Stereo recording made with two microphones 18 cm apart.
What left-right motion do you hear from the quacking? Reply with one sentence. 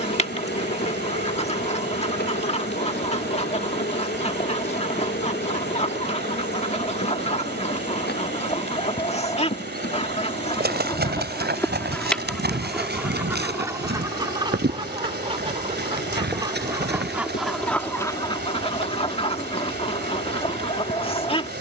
In this clip you hear the quacking move from left to right and back again.